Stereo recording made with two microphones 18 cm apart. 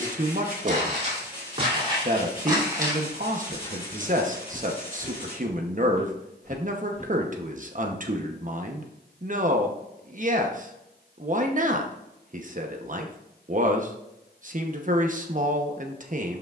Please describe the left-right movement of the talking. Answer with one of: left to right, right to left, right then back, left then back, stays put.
stays put.